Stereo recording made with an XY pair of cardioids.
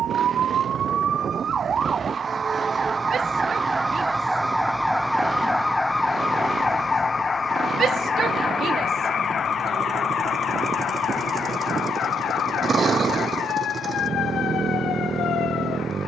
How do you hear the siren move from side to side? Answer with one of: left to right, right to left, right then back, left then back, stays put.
right to left.